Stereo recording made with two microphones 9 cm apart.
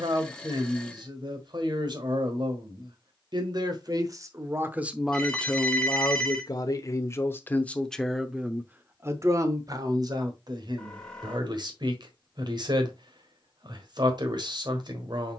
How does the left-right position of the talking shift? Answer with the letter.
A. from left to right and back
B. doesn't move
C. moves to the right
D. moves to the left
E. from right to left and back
E.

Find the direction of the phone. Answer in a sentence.
You can hear the phone in the centre.